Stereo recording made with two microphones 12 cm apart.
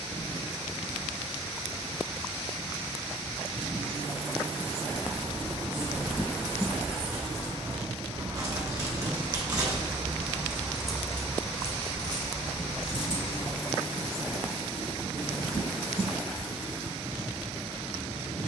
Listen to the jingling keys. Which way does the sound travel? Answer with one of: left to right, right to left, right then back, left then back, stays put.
right to left.